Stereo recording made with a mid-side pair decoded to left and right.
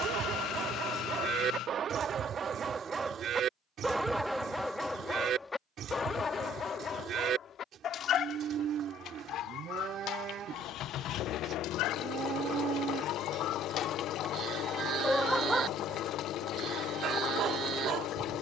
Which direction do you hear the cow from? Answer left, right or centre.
right.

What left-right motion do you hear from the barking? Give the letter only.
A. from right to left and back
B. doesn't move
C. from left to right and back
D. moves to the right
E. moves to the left
A.